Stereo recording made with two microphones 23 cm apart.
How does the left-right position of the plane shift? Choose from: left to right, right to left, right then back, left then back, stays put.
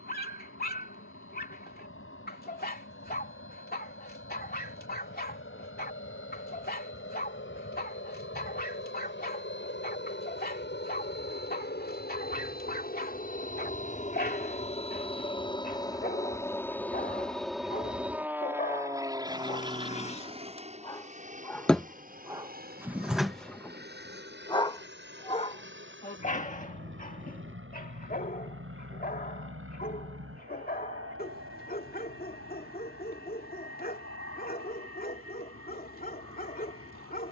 left to right.